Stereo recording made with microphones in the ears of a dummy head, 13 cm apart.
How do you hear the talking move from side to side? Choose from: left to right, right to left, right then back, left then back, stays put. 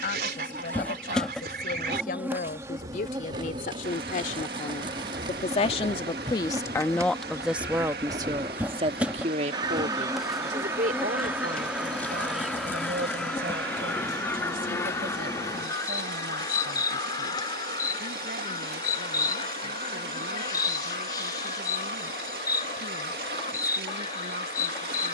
left to right.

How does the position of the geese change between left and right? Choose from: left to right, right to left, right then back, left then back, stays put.
right to left.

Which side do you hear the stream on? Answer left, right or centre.
right.